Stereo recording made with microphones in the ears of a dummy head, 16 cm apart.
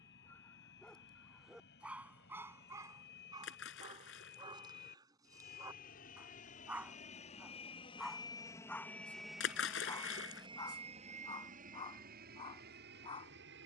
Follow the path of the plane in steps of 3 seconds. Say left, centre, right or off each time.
left, left, left, right, right.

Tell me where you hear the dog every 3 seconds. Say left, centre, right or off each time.
centre, right, centre, left, left.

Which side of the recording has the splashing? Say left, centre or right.
left.